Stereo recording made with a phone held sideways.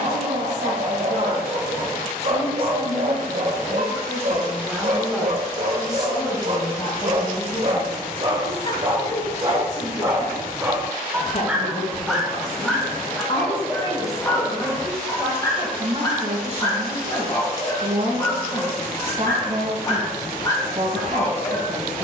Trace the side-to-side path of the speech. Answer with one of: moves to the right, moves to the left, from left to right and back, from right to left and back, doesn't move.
from right to left and back.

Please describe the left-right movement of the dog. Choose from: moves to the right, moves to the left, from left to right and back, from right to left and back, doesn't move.
moves to the left.